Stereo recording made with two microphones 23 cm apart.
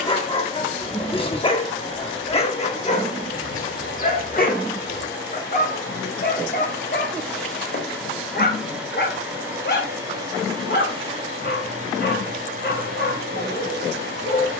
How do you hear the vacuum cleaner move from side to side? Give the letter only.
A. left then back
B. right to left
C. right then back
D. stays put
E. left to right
E.